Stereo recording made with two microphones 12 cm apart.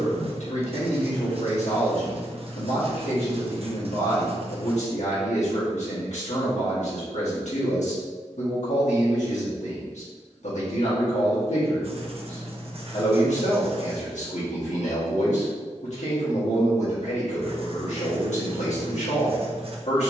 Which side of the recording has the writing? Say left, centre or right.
right.